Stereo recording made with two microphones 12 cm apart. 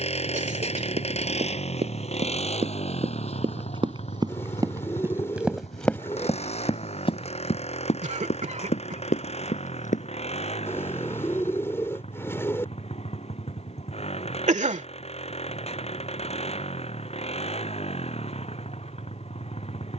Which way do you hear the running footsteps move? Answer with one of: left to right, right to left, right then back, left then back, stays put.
right to left.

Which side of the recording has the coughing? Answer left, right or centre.
right.